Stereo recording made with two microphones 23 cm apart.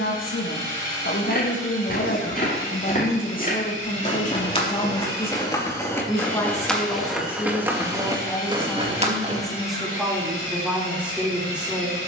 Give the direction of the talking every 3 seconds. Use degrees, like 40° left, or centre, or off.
60° left, 30° left, 10° left, centre.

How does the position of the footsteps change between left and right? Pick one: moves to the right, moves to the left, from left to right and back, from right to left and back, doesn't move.
moves to the right.